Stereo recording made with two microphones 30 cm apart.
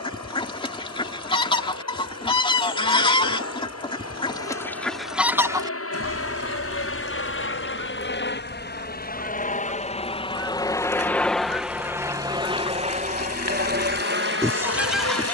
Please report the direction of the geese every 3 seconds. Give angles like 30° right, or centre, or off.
20° left, 10° left, 40° right, 50° right, 20° right.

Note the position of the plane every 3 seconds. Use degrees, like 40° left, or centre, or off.
70° left, 60° left, 40° left, 10° left, 30° right.